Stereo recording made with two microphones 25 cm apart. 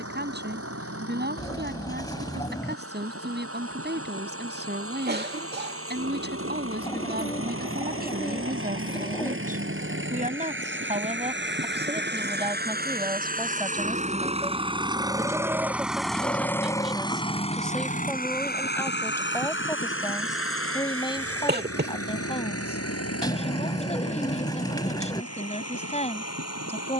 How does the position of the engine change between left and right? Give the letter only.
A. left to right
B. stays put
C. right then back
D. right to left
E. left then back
D.